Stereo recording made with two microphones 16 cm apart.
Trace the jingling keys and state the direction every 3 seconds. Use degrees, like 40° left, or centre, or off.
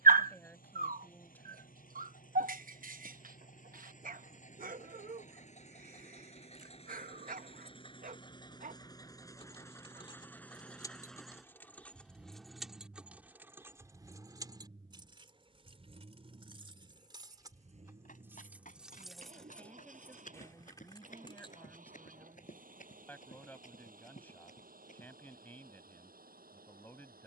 off, off, off, 20° left, 10° right, 30° right, centre, 30° left, off.